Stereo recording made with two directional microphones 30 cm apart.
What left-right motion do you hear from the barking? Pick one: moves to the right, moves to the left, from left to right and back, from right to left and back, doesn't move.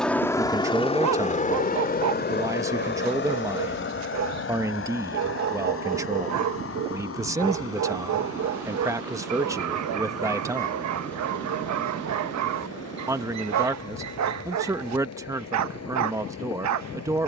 doesn't move.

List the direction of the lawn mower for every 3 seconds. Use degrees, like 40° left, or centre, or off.
20° left, 40° left, 50° left, 50° left, 50° left, 50° left.